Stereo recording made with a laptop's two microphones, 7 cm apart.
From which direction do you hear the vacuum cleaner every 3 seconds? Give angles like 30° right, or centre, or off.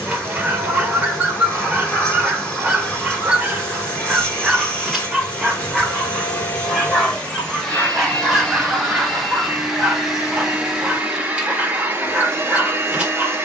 20° left, 20° left, 10° left, 10° right, 30° right.